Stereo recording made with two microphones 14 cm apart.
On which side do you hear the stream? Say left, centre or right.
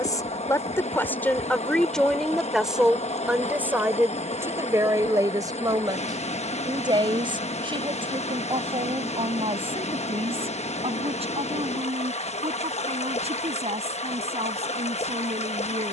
left.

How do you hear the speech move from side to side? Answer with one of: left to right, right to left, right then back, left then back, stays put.
left to right.